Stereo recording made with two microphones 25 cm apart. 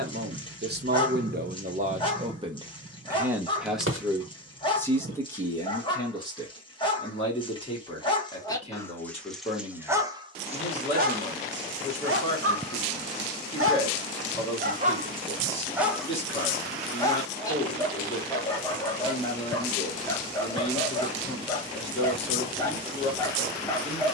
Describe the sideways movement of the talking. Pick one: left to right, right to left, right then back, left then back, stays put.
right to left.